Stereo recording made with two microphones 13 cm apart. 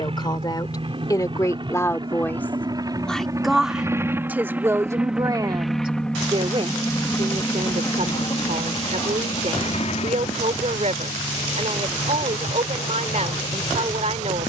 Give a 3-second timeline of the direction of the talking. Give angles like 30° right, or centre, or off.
20° left, 20° right, 50° right, 60° right, 60° right.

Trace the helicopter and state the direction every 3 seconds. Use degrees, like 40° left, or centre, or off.
40° right, 10° right, 20° left, 50° left, 70° left.